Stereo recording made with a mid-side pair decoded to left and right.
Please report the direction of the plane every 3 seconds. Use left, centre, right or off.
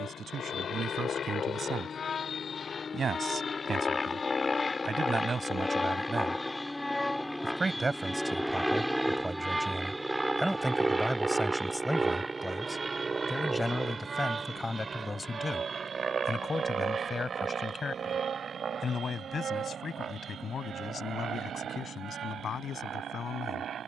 left, left, centre, centre, right, right, right, right.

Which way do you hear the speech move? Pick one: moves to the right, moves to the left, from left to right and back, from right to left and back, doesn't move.
moves to the left.